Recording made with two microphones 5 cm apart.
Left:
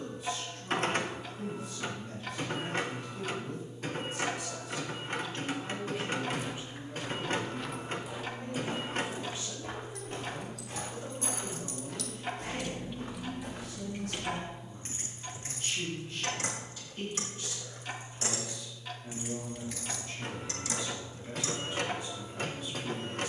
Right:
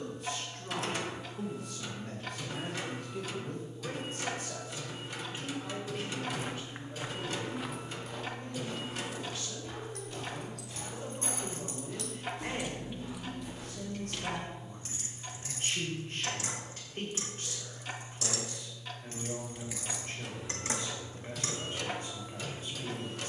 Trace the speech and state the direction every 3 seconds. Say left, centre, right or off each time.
right, right, left, centre, right, right, right, right.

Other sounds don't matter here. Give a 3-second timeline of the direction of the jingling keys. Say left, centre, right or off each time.
off, off, off, right, centre, left, centre, right.